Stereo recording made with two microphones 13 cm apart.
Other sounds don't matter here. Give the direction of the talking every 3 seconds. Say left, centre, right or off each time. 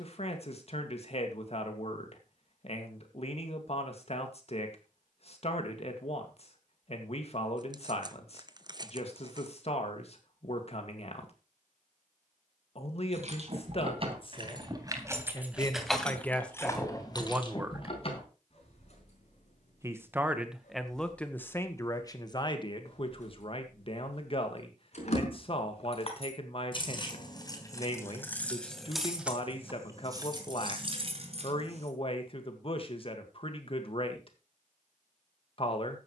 left, left, left, left, left, centre, centre, left, left, left, left, left.